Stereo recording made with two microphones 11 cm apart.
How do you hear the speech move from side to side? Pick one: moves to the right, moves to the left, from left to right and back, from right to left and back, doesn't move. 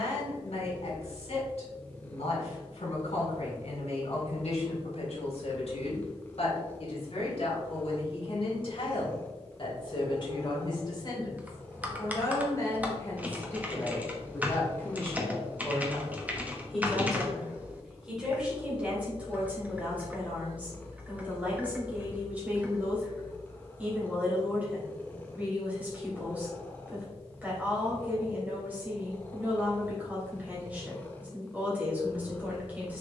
moves to the right.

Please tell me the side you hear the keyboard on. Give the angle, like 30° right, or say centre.
10° right.